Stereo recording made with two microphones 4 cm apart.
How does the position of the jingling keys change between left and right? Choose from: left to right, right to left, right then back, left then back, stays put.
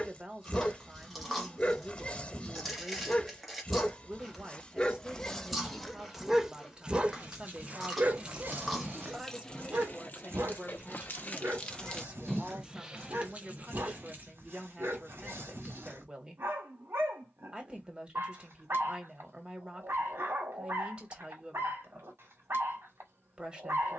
left then back.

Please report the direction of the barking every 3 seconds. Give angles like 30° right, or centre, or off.
30° left, 20° left, 40° right, 70° right, 80° right, 80° right, 80° right, 80° right.